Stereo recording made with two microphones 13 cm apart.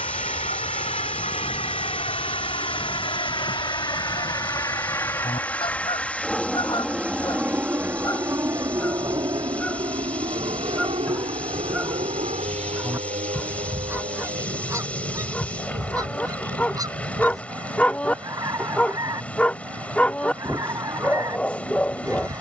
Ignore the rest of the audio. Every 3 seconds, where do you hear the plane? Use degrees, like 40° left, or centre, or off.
50° left, 30° left, 10° right, 40° right, 50° right, 60° right, 70° right, 70° right.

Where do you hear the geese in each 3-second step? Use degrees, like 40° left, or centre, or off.
70° left, 50° left, 30° left, centre, 20° right, 30° right, 30° right, 30° right.